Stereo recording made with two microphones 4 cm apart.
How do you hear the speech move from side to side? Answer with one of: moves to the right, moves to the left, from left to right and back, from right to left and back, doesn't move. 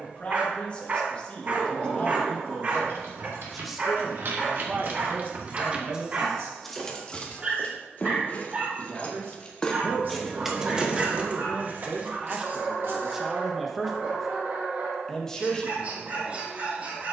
from left to right and back.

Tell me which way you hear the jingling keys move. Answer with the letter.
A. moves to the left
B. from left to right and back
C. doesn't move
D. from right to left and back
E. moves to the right
D.